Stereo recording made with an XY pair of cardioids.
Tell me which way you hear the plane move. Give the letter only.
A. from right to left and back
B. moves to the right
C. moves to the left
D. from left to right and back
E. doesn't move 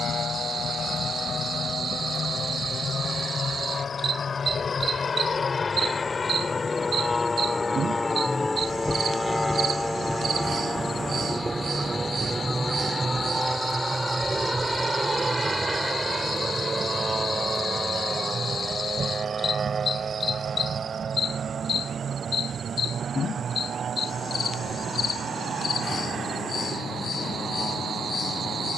B.